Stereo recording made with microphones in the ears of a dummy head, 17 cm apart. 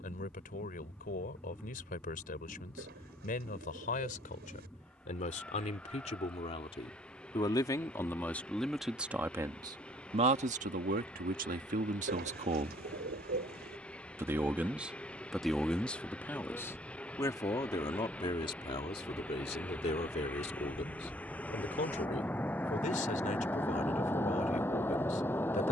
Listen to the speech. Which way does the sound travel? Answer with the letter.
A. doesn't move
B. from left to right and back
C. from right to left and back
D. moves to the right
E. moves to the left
B.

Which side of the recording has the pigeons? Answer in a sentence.
You can hear the pigeons on the right.